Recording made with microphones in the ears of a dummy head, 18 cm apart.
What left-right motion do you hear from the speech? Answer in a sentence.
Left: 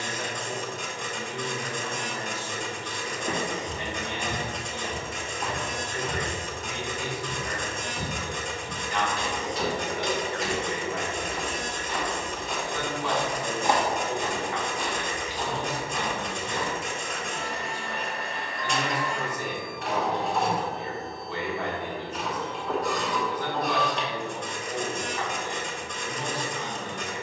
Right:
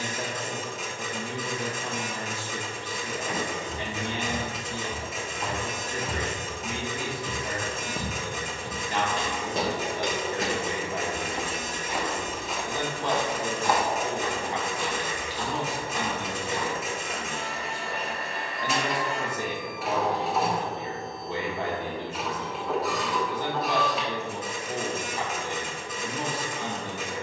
You can hear the speech stay in one place.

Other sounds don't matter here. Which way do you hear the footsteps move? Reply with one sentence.
You can hear the footsteps move from left to right and back again.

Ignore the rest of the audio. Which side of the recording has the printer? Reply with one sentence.
You can hear the printer in the centre.